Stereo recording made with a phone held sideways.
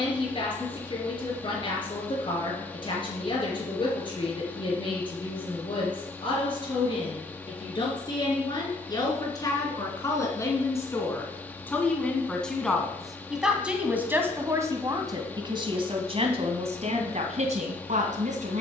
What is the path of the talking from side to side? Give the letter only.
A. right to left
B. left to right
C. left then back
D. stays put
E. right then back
B.